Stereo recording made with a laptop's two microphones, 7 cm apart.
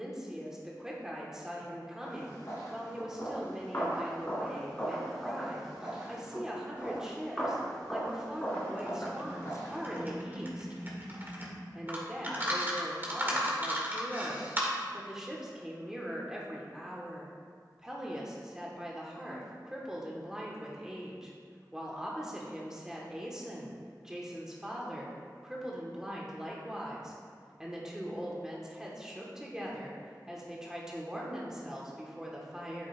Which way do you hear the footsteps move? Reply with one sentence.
You can hear the footsteps move from left to right and back again.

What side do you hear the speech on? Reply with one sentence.
You can hear the speech in the centre.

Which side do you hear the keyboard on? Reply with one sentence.
You can hear the keyboard on the right.